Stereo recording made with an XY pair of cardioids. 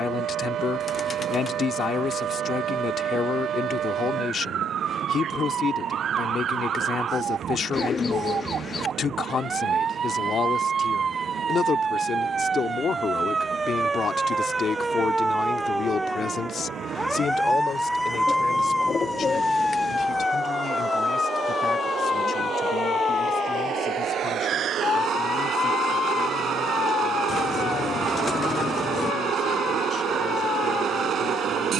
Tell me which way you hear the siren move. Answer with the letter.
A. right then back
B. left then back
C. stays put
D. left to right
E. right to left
E.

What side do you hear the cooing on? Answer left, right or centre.
left.